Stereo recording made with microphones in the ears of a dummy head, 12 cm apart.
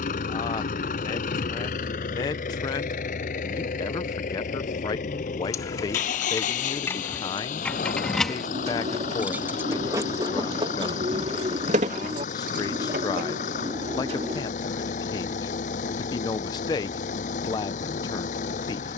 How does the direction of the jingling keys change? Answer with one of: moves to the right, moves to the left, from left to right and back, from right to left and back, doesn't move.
moves to the right.